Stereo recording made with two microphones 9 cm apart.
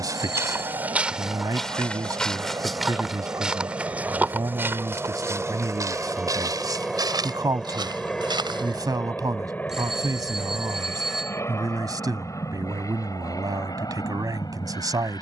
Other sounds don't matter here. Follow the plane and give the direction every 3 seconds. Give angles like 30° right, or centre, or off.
40° right, 20° right, centre, 20° left, 40° left.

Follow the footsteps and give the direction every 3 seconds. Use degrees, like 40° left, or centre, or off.
10° right, 20° right, 50° right, off, off.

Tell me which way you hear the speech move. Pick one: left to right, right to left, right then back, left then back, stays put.
stays put.